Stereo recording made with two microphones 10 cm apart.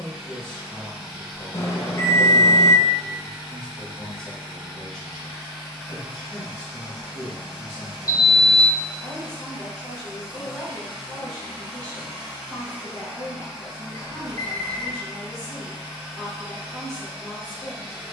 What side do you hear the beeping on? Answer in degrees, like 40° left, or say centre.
30° left.